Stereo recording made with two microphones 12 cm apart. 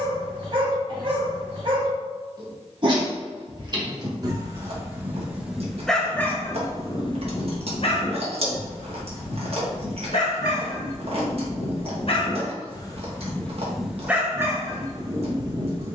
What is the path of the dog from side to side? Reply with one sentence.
In this clip you hear the dog move from right to left and back again.